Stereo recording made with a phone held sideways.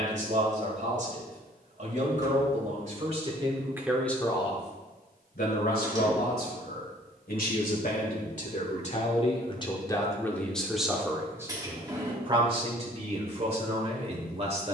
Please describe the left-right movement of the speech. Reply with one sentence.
In this clip you hear the speech go left and come back.